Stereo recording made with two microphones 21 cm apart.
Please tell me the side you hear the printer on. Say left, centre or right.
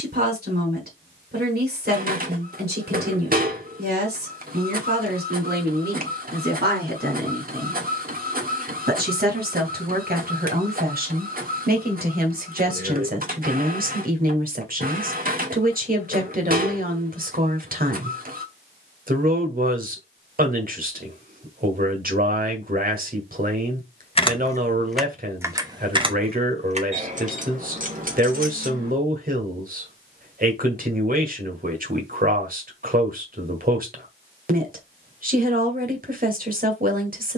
right.